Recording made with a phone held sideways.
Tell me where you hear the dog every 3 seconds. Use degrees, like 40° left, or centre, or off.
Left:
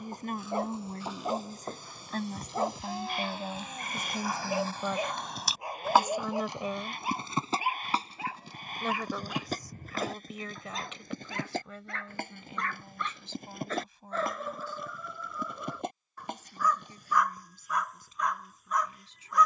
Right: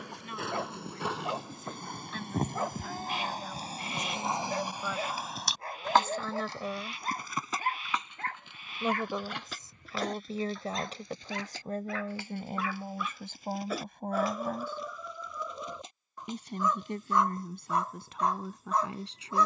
20° left, 10° left, 10° left, centre, 10° right, 20° right, 30° right.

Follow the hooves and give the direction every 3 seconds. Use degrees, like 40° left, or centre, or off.
60° right, 20° right, 30° left, 50° left, 50° left, 60° left, off.